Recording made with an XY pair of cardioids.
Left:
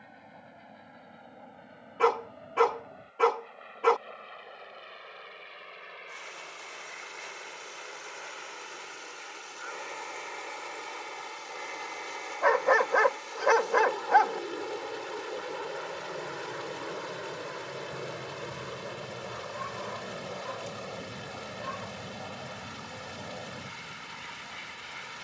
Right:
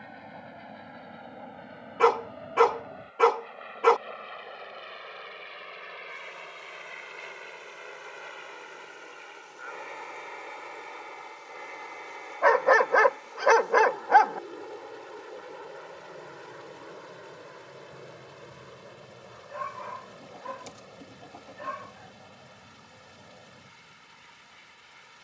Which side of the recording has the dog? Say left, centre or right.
right.